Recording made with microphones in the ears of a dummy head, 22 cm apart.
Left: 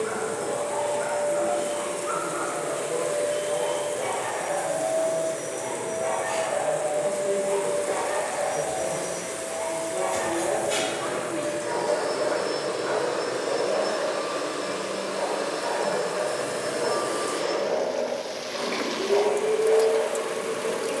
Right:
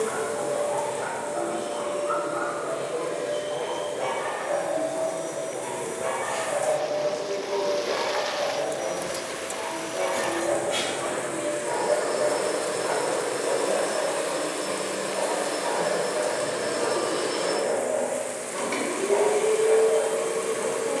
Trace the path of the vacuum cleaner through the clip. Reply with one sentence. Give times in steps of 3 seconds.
In this clip you hear the vacuum cleaner on the left from 0 s, in the centre from 15 s and on the right from 18 s.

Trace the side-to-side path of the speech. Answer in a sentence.
In this clip you hear the speech move to the right.